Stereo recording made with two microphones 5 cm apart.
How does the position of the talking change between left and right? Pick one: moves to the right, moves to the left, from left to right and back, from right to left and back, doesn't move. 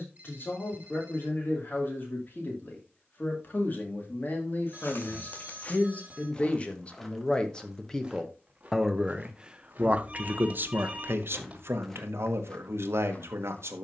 moves to the right.